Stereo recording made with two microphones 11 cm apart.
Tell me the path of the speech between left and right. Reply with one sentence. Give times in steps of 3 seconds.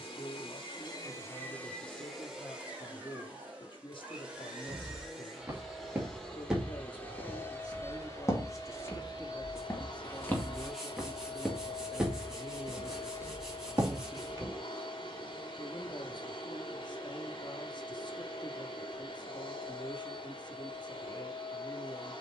You can hear the speech on the left from 0 s, in the centre from 9 s and on the left from 15 s.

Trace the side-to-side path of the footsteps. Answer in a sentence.
You can hear the footsteps go left and come back.